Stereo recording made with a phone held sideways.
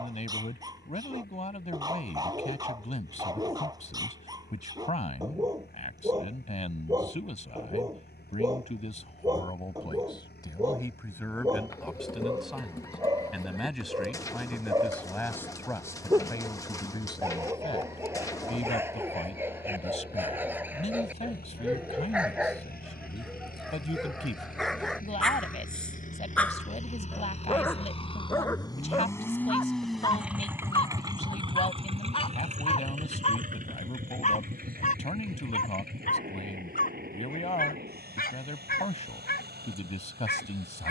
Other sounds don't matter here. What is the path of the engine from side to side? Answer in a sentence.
In this clip you hear the engine go from the left side to the right.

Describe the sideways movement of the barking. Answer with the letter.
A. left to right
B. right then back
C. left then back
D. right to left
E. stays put
D.